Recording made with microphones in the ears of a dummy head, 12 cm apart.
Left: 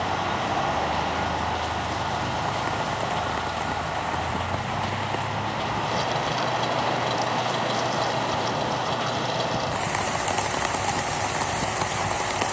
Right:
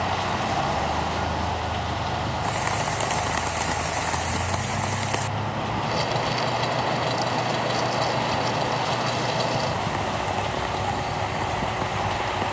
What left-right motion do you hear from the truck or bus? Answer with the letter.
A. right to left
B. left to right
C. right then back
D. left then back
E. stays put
E.